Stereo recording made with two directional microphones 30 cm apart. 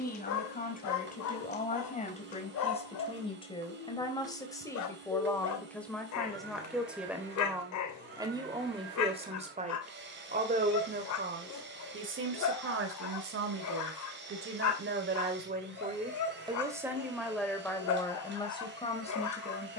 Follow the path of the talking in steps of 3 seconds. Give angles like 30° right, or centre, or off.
30° left, 10° left, 10° right, 30° right, 40° right, 10° right, 20° left.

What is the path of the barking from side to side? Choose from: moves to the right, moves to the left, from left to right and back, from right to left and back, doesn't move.
doesn't move.